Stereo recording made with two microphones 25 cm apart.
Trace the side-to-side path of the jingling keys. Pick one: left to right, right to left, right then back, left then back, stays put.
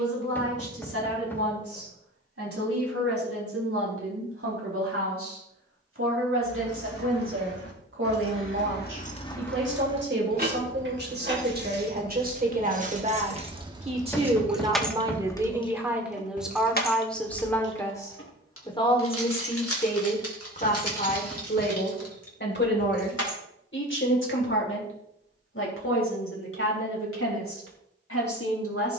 right then back.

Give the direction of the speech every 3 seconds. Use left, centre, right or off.
right, right, right, right, right, centre, left, left, left, left.